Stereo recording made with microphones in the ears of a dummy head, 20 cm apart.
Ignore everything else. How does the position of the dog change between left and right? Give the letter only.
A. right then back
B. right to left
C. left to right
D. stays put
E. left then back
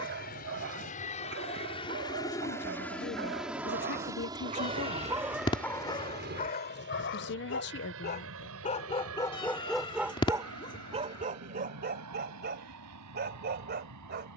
E.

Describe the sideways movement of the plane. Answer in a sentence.
In this clip you hear the plane travel towards the right.